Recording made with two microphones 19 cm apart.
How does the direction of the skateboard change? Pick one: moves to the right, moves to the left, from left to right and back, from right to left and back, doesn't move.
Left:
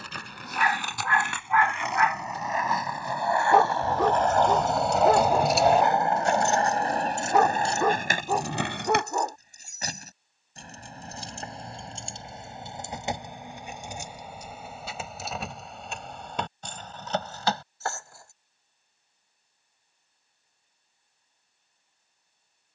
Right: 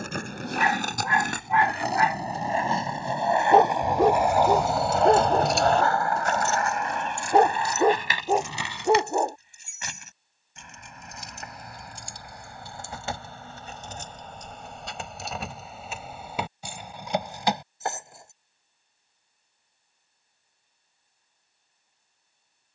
moves to the left.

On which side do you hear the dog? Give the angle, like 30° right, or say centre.
30° right.